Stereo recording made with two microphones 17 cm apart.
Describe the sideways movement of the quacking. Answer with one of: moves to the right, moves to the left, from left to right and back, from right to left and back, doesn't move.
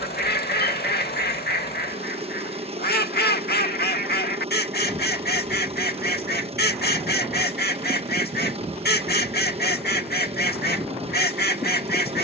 doesn't move.